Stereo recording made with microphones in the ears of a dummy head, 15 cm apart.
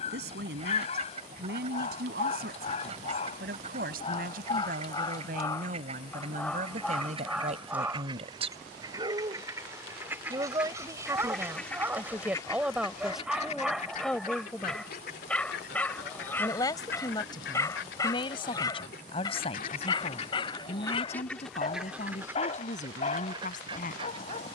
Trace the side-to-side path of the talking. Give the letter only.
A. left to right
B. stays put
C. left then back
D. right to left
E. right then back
D.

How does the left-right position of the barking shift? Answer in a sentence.
You can hear the barking go right and come back.